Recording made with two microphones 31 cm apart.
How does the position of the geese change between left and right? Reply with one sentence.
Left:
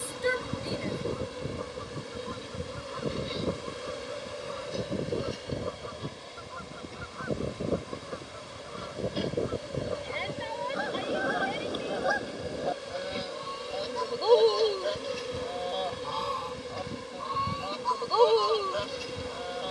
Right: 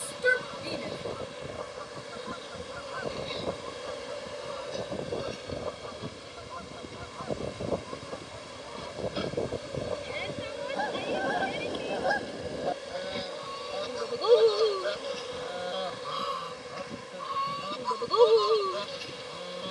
In this clip you hear the geese move from left to right.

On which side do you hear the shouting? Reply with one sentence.
You can hear the shouting in the centre.